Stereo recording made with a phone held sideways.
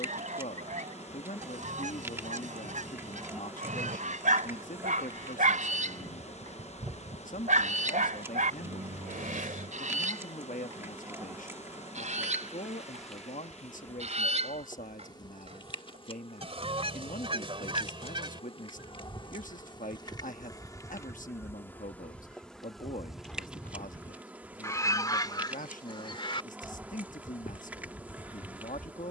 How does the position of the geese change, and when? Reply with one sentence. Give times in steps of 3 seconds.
You can hear the geese on the right from 0 s, in the centre from 21 s and on the left from 24 s.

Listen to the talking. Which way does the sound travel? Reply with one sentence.
In this clip you hear the talking stay put.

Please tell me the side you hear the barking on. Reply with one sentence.
You can hear the barking on the right.